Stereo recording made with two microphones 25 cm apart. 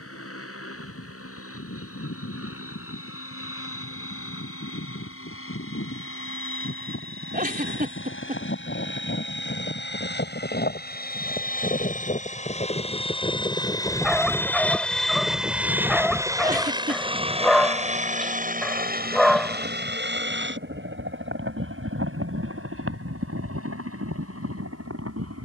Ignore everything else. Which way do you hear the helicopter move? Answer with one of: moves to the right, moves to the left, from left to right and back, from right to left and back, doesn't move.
moves to the right.